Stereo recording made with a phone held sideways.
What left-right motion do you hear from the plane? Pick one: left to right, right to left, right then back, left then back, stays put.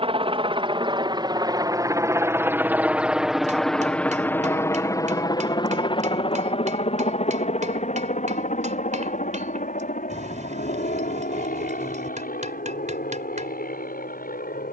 right to left.